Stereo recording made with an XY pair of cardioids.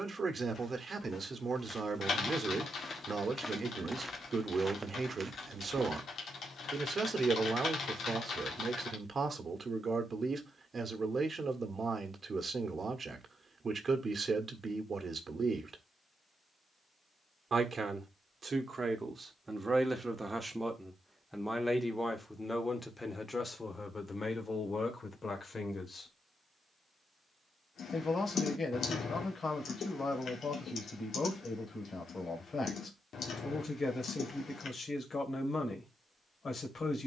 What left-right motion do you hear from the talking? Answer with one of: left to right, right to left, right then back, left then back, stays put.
right to left.